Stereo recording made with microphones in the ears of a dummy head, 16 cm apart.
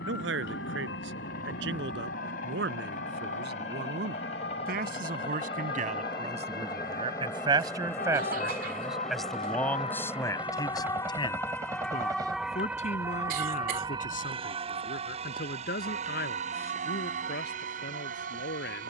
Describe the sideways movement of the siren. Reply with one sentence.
You can hear the siren move to the right.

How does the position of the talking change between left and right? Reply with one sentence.
You can hear the talking move from right to left.